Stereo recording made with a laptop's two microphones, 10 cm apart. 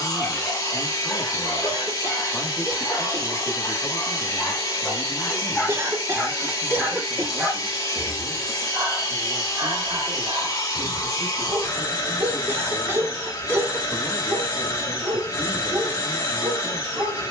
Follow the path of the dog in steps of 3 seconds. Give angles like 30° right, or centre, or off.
20° left, 20° left, 10° right, 40° right, 50° right, 50° right.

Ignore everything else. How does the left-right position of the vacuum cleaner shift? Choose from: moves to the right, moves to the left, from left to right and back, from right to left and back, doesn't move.
doesn't move.